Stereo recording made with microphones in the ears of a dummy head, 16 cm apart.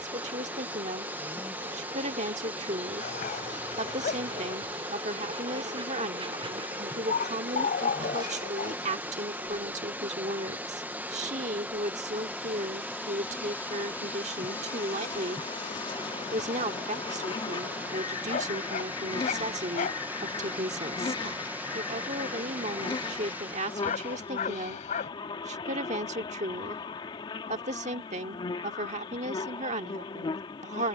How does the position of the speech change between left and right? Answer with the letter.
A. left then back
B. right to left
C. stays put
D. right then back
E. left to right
C.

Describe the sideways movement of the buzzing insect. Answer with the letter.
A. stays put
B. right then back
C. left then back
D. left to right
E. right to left
E.